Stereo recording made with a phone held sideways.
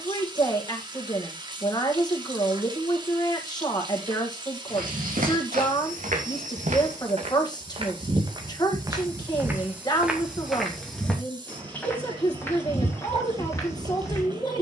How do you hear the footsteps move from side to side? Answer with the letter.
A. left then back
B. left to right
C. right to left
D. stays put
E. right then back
C.